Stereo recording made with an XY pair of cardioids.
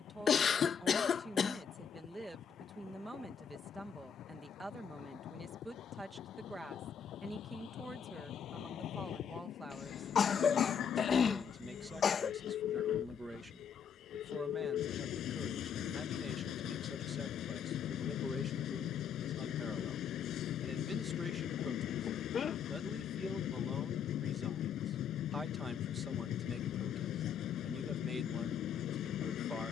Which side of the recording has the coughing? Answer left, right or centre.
left.